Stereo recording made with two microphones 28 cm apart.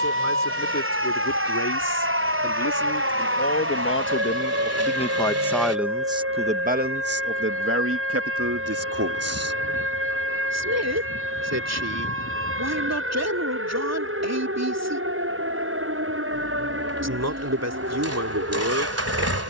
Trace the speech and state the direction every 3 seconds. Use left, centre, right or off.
left, left, right, right, right, right, right.